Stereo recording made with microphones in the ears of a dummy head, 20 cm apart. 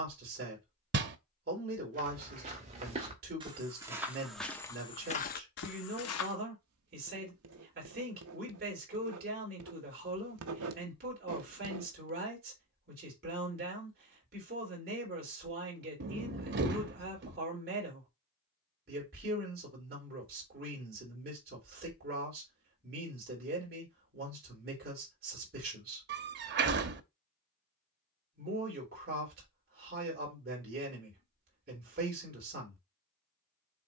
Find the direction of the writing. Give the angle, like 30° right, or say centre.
70° right.